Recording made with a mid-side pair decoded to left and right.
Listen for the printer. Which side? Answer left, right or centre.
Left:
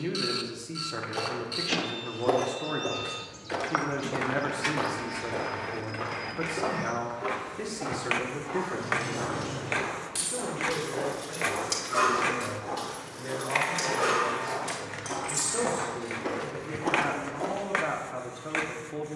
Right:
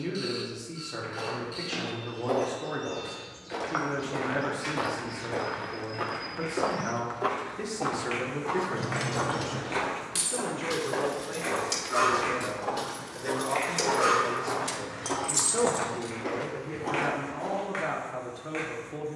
left.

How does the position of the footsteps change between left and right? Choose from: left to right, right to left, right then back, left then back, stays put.
right then back.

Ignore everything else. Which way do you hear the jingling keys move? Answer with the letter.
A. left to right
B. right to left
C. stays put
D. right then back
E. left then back
E.